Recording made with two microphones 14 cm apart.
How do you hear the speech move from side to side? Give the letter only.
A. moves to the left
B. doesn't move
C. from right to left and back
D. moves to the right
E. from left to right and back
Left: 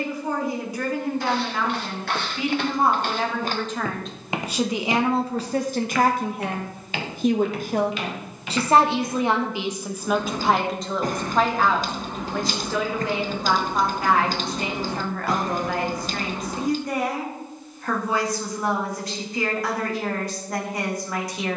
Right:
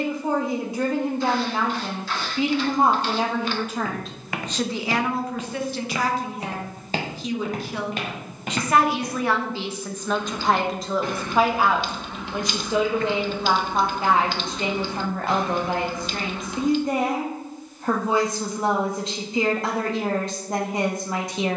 C.